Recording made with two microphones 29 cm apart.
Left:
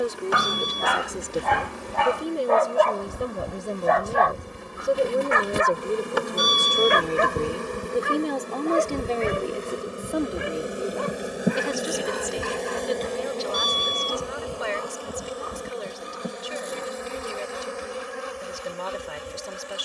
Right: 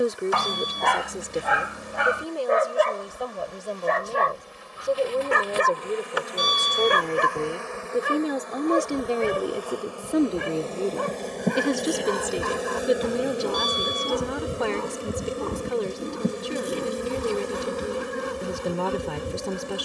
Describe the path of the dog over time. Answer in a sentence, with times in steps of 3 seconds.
In this clip you hear the dog in the centre from 0 s and on the right from 3 s.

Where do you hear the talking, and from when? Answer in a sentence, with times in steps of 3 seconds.
You can hear the talking in the centre from 0 s, on the left from 3 s, in the centre from 6 s and on the right from 9 s.